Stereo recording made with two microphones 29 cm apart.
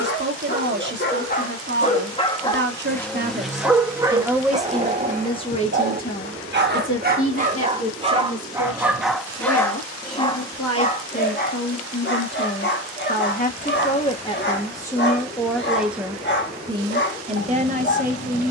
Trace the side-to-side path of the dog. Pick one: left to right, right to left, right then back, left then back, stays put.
right then back.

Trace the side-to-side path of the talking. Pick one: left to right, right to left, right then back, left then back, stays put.
left then back.